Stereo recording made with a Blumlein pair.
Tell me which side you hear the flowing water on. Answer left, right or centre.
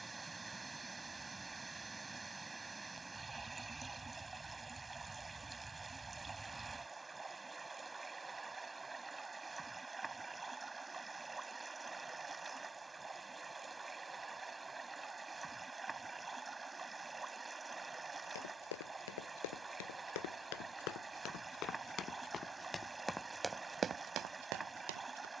centre.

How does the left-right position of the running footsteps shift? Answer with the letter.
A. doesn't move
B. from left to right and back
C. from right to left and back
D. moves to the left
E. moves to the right
E.